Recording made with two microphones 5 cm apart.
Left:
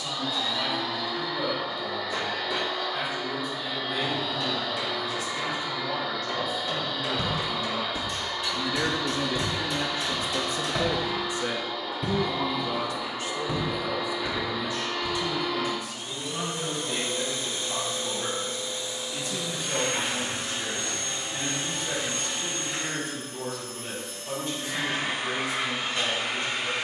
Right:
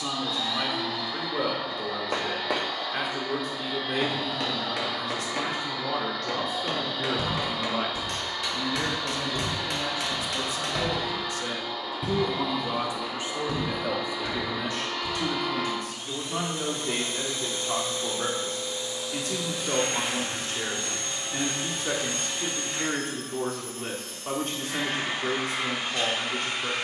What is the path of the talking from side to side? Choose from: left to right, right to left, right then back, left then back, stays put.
left then back.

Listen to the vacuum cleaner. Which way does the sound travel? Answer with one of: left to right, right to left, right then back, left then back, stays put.
stays put.